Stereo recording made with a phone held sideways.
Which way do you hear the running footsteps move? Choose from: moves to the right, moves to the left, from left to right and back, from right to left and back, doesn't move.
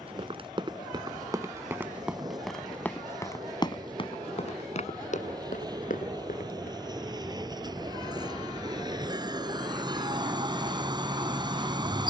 moves to the left.